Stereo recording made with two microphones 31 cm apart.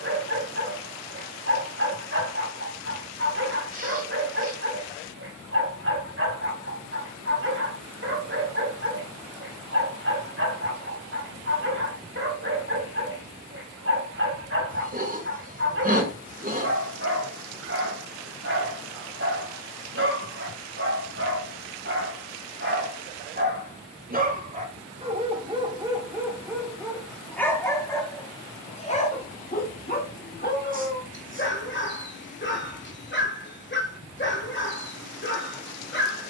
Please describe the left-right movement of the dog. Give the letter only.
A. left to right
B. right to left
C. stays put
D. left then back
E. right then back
B.